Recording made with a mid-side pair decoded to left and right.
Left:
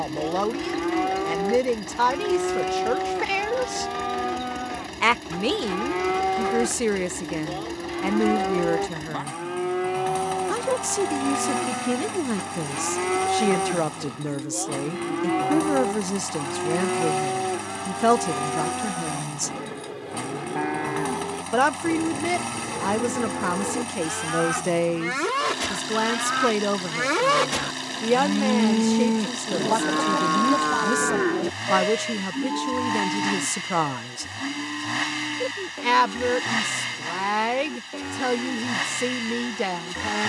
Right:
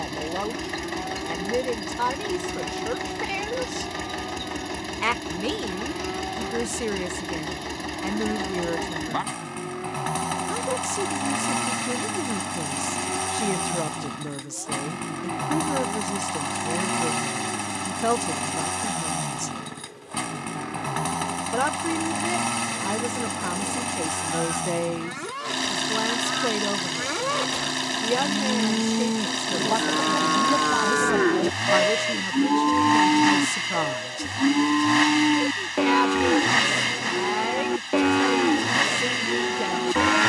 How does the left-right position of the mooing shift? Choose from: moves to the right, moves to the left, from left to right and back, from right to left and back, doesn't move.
moves to the right.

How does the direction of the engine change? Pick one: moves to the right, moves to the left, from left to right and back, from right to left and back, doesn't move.
doesn't move.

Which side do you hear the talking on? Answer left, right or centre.
left.